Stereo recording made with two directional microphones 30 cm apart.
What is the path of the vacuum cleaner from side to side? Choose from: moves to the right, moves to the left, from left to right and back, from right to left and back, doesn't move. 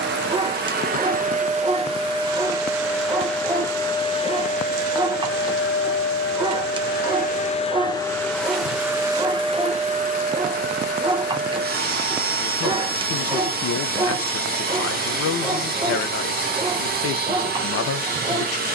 from right to left and back.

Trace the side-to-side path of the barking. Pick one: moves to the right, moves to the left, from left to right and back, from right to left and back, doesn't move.
doesn't move.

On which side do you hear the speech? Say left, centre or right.
left.